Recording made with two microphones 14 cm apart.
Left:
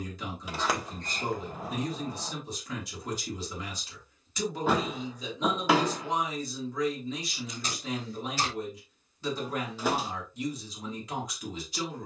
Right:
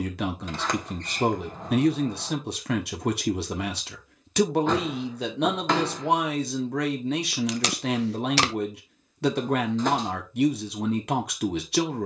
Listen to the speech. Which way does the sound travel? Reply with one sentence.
In this clip you hear the speech stay put.